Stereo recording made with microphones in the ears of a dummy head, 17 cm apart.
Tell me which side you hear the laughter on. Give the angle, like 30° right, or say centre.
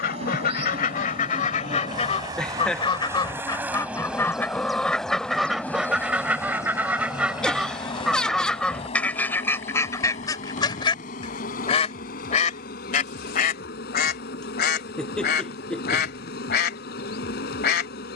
centre.